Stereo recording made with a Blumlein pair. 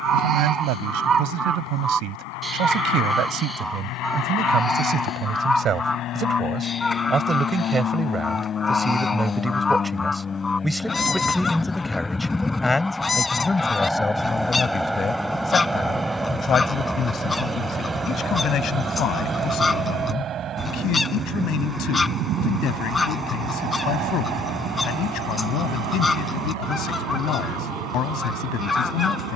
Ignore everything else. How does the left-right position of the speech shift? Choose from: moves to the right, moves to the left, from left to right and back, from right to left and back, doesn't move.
moves to the left.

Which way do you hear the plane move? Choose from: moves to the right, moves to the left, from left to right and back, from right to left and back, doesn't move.
moves to the right.